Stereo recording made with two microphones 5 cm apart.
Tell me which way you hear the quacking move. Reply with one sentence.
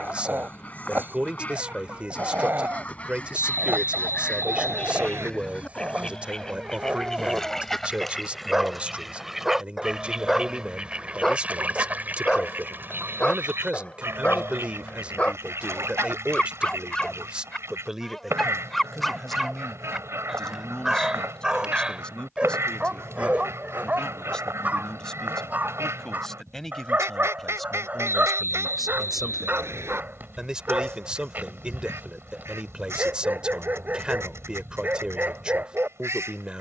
In this clip you hear the quacking go from the left side to the right.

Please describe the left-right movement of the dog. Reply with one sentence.
In this clip you hear the dog move from right to left and back again.